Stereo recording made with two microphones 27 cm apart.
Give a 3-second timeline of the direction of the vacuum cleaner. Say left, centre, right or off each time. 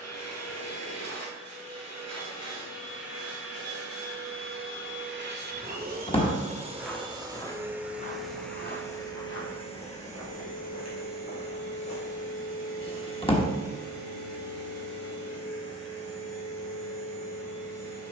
right, right, centre, left, left, left.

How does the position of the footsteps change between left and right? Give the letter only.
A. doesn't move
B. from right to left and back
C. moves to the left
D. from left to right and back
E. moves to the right
C.